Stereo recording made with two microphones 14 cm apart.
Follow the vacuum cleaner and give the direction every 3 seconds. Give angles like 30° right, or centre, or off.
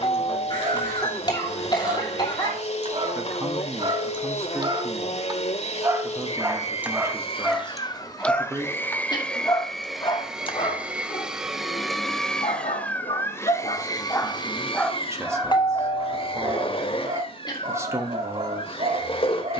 50° left, 50° left, 30° left, centre, 20° left, 40° left, 40° left.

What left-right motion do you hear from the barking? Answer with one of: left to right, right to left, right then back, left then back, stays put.
left then back.